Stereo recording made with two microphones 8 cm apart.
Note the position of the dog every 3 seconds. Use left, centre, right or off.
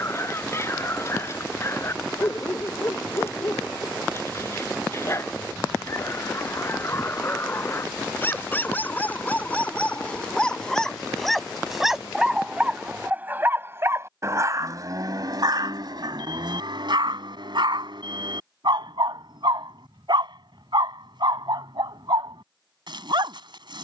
left, left, left, centre, right, right, right, right.